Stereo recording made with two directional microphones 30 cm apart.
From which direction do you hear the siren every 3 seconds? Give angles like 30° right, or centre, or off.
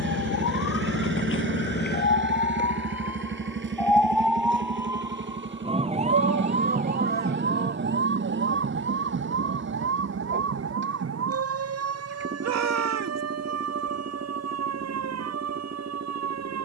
40° left, centre, 30° right, 50° right, 50° right, 60° right.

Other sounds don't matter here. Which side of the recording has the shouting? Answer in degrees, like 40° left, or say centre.
60° right.